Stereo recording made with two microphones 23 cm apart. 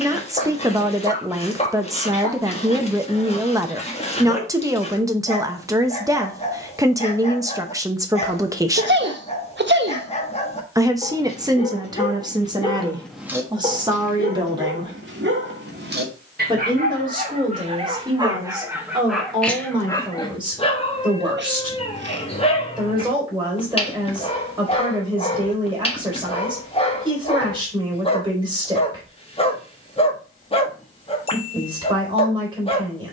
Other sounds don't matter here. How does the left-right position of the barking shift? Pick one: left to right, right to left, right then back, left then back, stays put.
right then back.